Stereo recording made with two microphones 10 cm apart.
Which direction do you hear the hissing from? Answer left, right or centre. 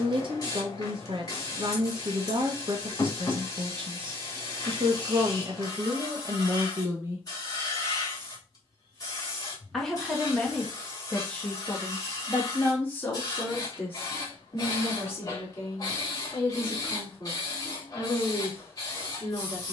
left.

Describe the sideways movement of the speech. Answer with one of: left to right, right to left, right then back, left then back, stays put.
right to left.